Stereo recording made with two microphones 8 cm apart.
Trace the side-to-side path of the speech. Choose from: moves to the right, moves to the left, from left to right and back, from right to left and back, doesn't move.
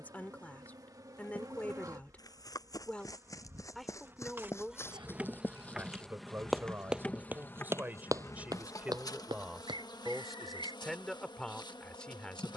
from left to right and back.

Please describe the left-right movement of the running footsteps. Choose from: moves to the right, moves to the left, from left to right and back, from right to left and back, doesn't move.
moves to the right.